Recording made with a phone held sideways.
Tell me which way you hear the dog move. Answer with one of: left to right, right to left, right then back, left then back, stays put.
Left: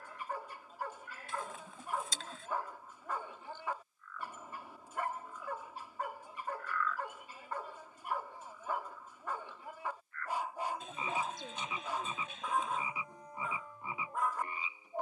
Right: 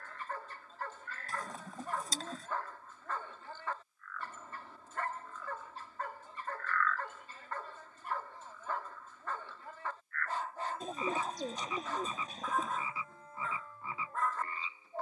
stays put.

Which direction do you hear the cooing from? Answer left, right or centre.
right.